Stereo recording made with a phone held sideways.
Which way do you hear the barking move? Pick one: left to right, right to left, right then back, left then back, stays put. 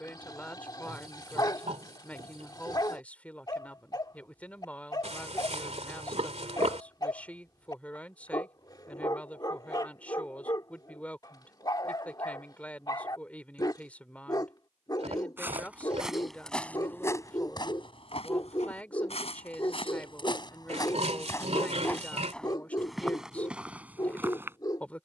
stays put.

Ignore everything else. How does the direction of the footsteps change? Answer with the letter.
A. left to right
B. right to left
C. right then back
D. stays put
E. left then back
E.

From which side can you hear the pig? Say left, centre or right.
right.